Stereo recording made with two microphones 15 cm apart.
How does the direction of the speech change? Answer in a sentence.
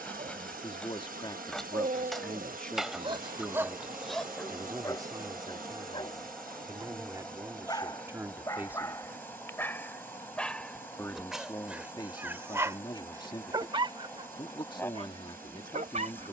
You can hear the speech move from left to right and back again.